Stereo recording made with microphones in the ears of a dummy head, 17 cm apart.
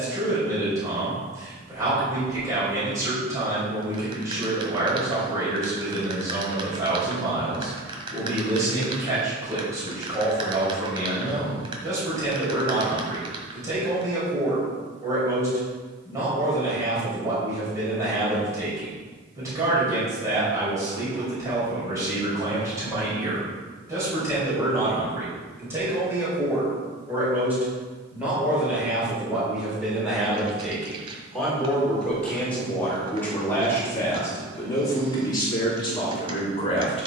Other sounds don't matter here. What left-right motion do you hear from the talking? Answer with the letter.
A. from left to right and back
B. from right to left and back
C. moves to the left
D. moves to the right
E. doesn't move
C.